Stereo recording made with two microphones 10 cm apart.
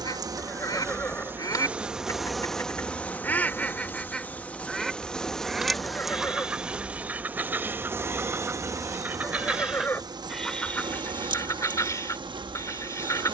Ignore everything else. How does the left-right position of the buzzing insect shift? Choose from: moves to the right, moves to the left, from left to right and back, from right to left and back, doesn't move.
from right to left and back.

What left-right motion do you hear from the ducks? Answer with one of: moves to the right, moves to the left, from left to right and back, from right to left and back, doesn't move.
from left to right and back.